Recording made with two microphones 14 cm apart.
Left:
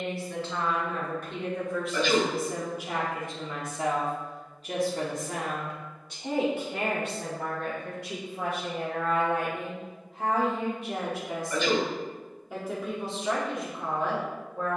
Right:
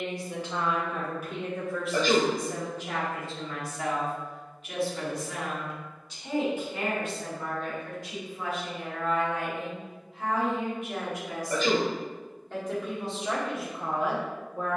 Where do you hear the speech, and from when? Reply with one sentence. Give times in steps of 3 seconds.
You can hear the speech in the centre from 0 s, on the left from 3 s and in the centre from 12 s.